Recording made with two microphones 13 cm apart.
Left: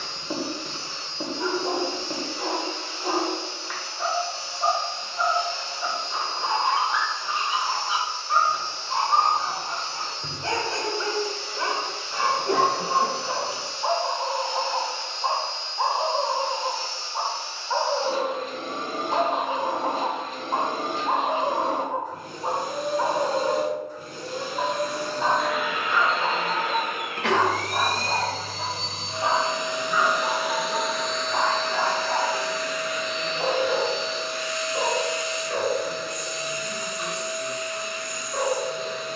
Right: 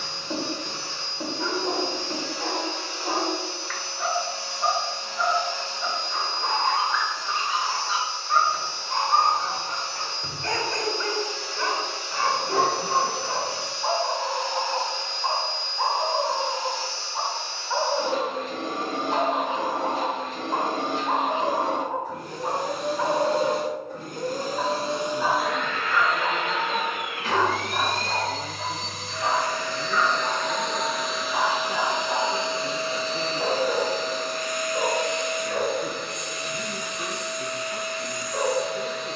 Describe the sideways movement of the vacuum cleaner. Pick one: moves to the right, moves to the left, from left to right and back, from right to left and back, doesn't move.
from right to left and back.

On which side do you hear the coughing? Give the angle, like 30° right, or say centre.
70° left.